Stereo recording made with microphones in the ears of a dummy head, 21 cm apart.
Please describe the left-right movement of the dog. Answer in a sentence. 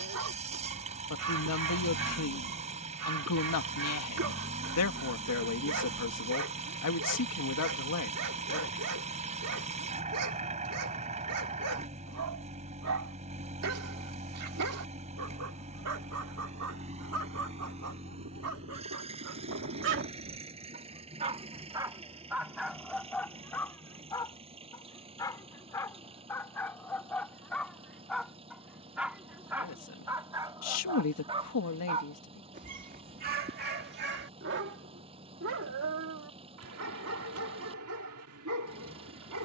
In this clip you hear the dog move from right to left and back again.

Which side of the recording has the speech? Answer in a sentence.
In this clip you hear the speech on the left.